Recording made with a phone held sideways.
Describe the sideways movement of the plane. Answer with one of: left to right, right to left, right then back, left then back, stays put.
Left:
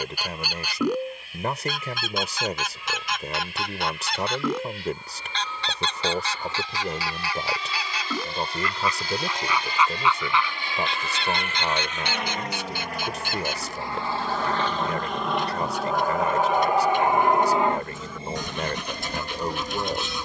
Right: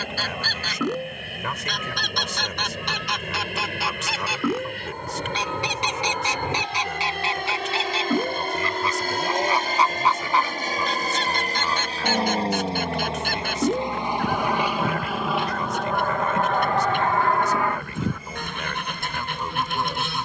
right to left.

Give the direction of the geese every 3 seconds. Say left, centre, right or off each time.
centre, centre, right, right, right, right, right.